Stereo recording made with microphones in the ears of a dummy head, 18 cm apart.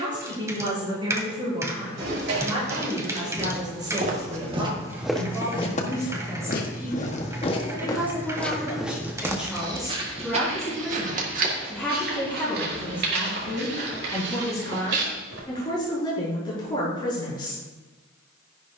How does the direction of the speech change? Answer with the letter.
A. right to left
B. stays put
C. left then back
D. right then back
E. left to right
A.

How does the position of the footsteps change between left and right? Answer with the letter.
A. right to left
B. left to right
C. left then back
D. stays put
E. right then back
C.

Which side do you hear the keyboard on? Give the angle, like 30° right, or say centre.
10° right.